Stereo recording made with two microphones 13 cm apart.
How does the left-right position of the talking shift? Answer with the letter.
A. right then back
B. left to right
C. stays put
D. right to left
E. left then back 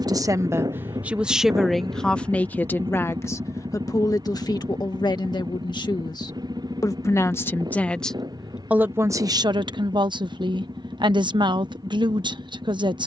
E.